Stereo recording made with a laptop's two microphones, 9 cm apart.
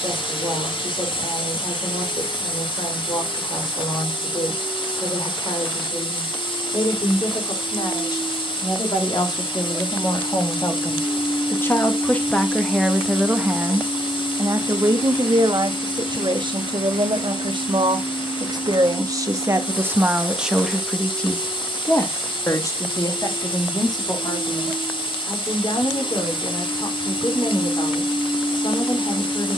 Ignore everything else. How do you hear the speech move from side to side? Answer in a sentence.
In this clip you hear the speech move from left to right and back again.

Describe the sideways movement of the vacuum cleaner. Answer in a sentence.
You can hear the vacuum cleaner stay in one place.